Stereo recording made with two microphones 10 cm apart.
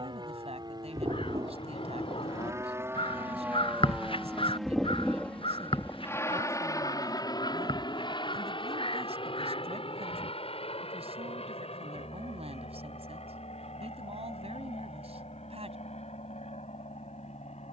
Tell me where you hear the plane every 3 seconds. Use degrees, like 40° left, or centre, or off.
40° right, centre, 40° left, 60° left, 70° left, 80° left.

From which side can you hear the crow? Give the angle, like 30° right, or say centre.
60° left.